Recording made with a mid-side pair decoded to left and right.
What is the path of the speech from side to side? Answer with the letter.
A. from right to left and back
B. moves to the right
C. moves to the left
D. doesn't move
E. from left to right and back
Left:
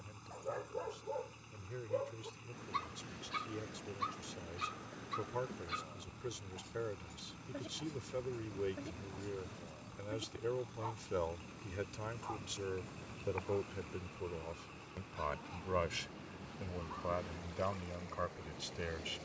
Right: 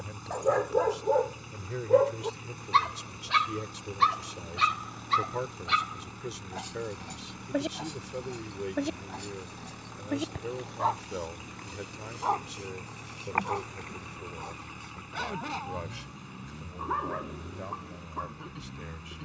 C.